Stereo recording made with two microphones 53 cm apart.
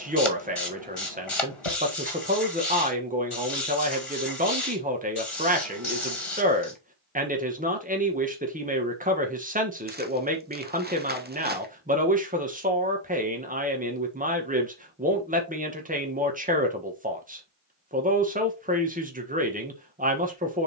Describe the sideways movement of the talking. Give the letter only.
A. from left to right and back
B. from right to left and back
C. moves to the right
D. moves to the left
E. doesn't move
E.